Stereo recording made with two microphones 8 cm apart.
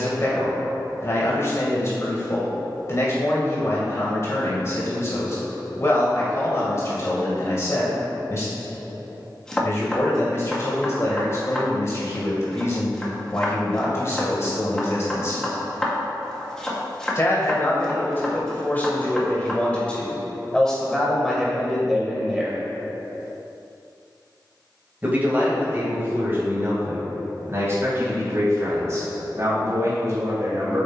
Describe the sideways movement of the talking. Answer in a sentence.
In this clip you hear the talking move to the right.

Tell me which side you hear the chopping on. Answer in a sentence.
In this clip you hear the chopping in the centre.